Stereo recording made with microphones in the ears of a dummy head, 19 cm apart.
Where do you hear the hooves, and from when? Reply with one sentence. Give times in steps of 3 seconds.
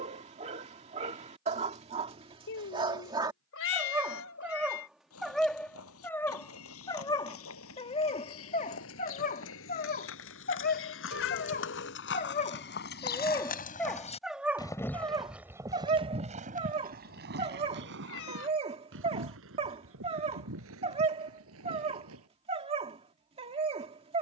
In this clip you hear the hooves not at all from 0 s, on the left from 3 s and on the right from 15 s.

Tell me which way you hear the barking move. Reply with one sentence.
In this clip you hear the barking go left and come back.